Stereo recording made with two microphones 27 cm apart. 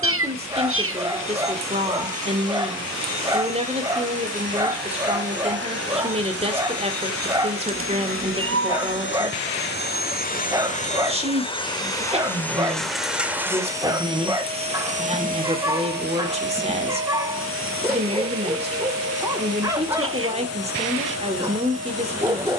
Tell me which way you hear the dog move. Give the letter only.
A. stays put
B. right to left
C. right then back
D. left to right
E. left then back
A.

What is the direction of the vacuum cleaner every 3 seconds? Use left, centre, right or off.
left, left, left, left, centre, right, right, right.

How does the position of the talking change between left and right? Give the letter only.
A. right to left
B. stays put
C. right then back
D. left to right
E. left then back
B.